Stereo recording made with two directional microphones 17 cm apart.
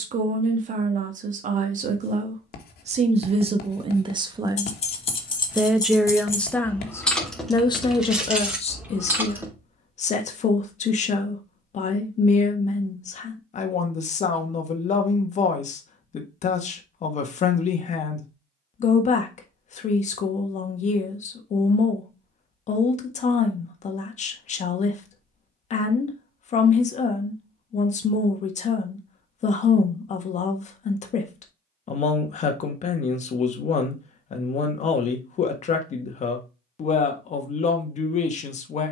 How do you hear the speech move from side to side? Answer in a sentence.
In this clip you hear the speech move from right to left.